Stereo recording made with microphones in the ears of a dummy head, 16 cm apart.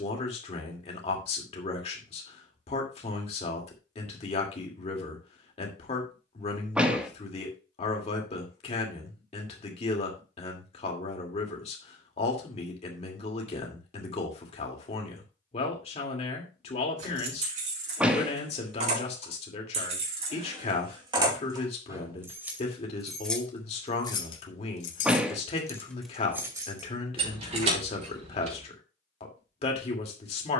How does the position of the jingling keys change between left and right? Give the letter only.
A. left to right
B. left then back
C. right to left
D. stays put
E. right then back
B.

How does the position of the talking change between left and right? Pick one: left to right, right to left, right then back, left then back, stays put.
stays put.